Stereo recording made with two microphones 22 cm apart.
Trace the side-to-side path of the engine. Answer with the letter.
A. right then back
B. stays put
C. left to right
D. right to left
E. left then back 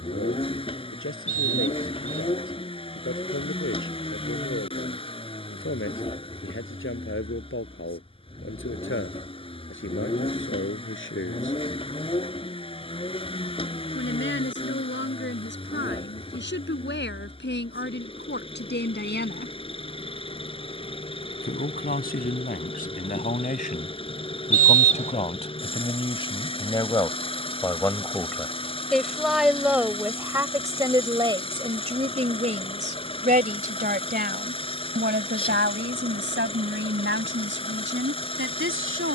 B.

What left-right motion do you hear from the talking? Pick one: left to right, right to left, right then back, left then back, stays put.
left to right.